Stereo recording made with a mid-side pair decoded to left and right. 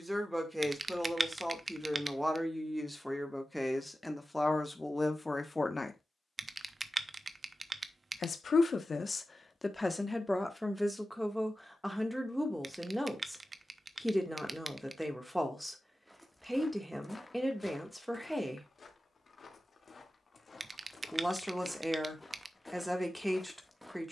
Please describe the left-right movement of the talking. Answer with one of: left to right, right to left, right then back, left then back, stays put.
left then back.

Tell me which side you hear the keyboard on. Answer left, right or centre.
right.